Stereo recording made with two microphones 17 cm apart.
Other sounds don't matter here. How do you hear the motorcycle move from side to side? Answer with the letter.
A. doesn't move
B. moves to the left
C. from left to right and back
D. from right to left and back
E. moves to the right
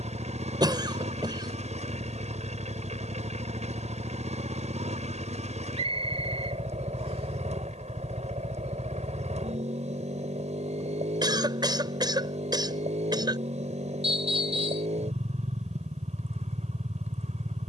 A.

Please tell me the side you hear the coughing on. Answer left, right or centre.
right.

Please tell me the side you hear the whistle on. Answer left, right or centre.
right.